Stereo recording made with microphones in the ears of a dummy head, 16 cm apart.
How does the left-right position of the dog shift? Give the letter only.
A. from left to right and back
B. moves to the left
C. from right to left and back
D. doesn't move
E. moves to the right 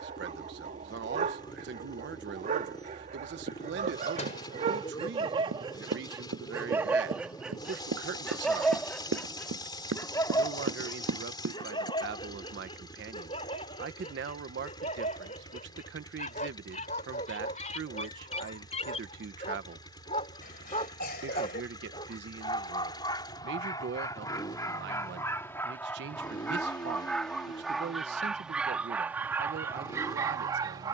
C.